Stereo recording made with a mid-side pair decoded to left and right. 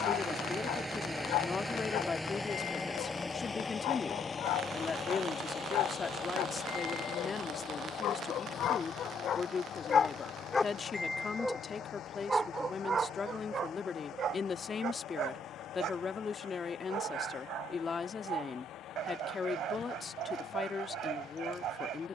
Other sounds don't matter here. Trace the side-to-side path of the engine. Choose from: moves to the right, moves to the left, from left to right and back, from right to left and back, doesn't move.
moves to the left.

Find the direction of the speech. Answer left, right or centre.
left.